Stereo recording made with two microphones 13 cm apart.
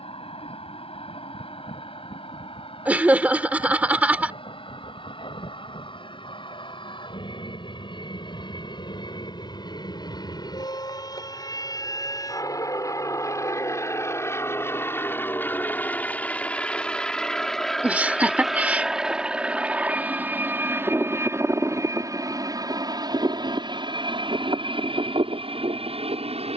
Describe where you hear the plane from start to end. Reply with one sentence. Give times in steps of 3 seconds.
In this clip you hear the plane on the left from 0 s, in the centre from 15 s and on the right from 21 s.